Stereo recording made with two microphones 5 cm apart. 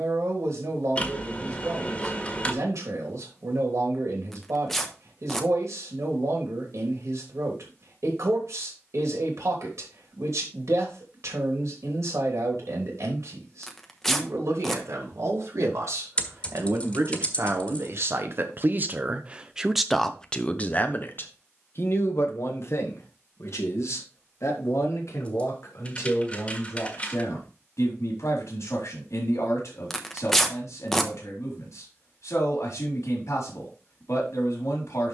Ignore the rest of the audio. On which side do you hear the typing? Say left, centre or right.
left.